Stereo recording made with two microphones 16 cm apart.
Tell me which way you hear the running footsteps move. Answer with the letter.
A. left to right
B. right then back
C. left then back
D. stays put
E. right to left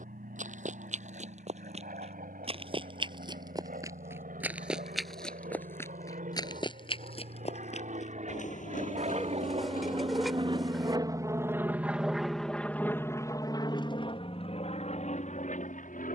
E.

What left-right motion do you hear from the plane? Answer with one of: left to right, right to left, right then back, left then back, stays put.
right to left.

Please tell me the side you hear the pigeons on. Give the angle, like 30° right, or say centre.
centre.